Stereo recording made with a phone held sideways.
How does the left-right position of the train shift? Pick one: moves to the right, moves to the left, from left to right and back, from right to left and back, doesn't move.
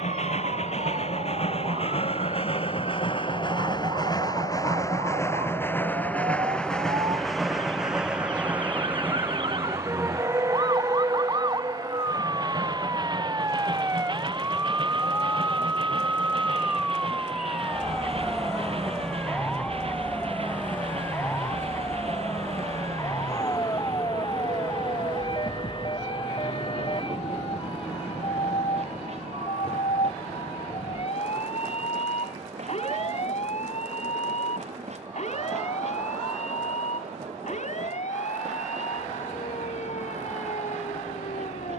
moves to the right.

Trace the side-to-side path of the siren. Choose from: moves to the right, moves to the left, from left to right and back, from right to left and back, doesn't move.
moves to the left.